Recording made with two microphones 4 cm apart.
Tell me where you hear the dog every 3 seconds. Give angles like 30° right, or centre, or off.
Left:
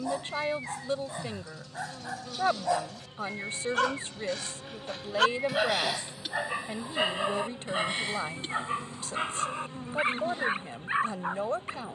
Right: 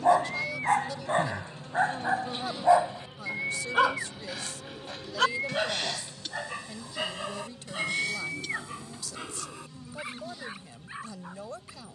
40° right, centre, 20° left, 40° left.